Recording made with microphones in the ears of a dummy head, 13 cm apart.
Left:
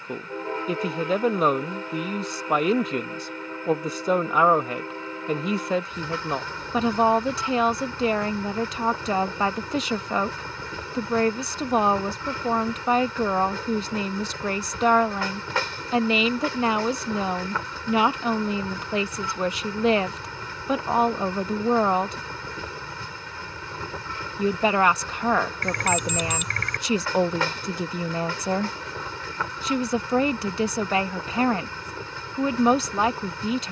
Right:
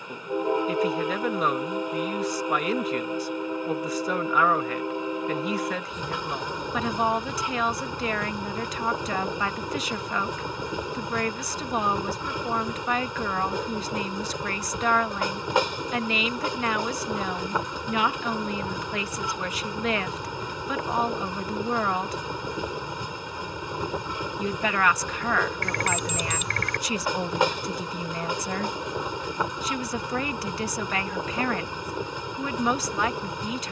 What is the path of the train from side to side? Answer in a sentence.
You can hear the train stay put.